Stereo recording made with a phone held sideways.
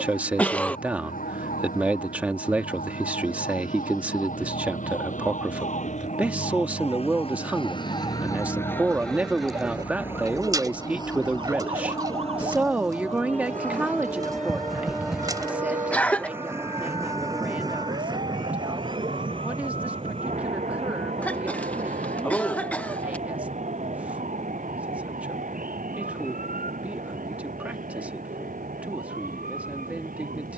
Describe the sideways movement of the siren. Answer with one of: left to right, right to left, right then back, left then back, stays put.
left to right.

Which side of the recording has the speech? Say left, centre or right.
centre.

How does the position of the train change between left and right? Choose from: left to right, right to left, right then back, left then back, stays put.
left to right.